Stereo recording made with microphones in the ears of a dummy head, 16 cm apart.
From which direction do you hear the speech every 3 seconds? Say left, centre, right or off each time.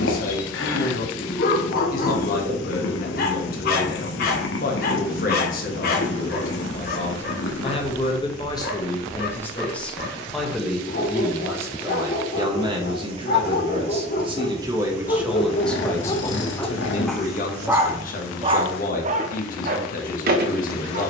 left, left, left, centre, right, left, left.